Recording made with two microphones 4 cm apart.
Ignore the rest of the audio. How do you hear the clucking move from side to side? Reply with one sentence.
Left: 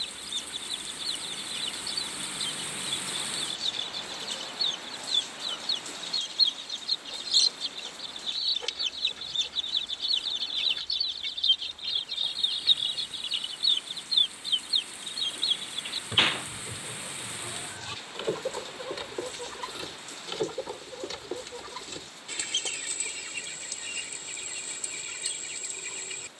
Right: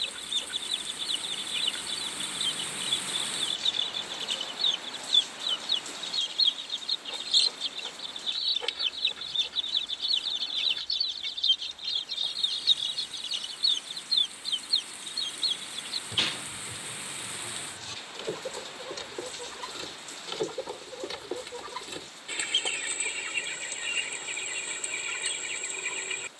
In this clip you hear the clucking move from right to left and back again.